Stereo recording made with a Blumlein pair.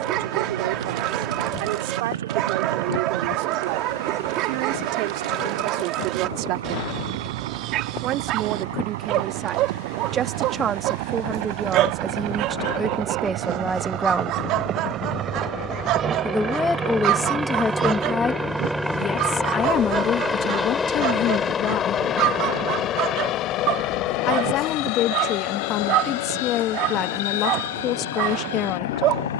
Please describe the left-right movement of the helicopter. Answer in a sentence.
In this clip you hear the helicopter move from right to left.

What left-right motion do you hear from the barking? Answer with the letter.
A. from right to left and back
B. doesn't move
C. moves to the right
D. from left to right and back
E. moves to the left
B.